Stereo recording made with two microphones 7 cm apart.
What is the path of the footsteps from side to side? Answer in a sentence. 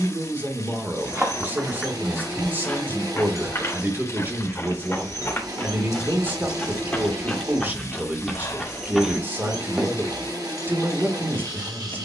You can hear the footsteps move from right to left and back again.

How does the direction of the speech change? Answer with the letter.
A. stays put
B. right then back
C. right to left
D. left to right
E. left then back
A.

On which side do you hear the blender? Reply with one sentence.
You can hear the blender on the right.